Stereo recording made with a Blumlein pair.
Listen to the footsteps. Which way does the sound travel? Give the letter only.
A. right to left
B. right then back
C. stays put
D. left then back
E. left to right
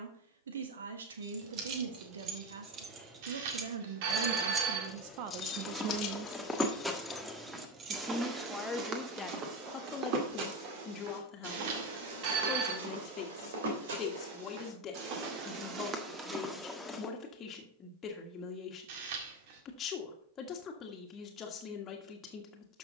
B.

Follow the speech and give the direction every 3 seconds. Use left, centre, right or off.
right, right, centre, left, left, left, left, left.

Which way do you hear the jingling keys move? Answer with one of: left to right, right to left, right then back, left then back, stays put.
left then back.